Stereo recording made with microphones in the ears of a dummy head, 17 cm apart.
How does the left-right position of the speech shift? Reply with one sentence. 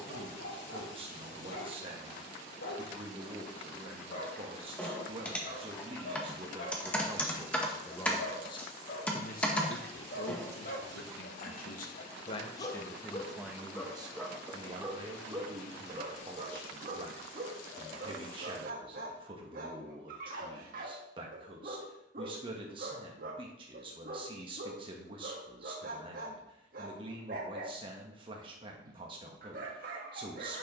In this clip you hear the speech move from right to left and back again.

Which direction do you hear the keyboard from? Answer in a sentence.
In this clip you hear the keyboard in the centre.